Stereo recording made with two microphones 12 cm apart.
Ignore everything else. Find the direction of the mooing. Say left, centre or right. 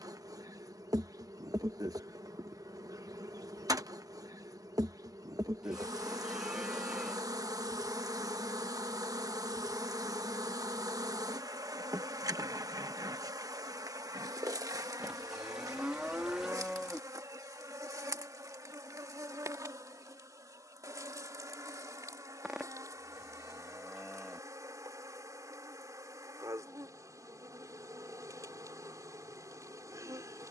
centre.